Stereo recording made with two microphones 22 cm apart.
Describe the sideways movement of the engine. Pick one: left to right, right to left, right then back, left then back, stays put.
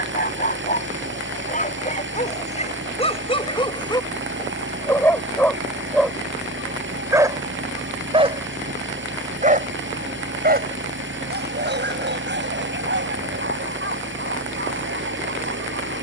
stays put.